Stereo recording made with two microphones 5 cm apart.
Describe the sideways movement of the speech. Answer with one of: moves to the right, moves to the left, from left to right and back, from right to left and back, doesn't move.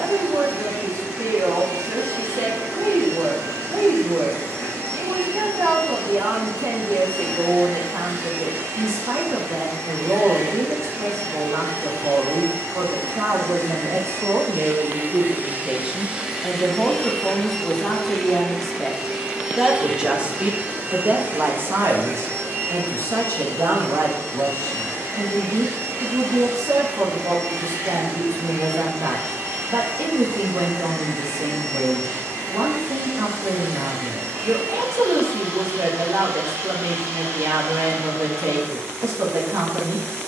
from right to left and back.